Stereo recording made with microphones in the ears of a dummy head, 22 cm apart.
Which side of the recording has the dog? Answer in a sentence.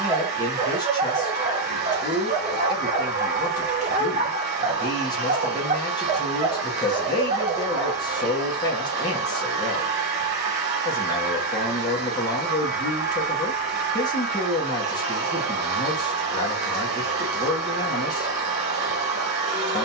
In this clip you hear the dog on the right.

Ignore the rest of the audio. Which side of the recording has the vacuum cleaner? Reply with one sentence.
In this clip you hear the vacuum cleaner on the right.